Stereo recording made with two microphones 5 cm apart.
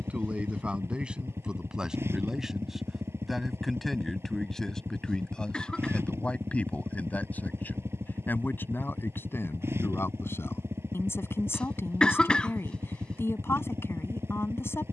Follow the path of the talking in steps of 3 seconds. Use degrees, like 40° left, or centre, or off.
20° right, 10° left, 30° left, 50° left, 50° left.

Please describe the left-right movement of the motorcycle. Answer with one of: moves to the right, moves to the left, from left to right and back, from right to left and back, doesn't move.
doesn't move.